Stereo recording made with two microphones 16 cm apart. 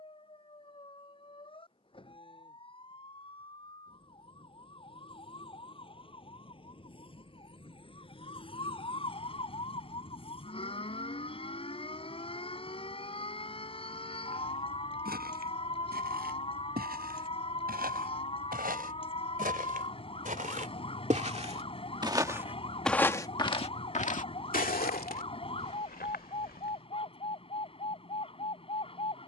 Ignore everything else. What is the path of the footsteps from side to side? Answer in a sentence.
In this clip you hear the footsteps move to the left.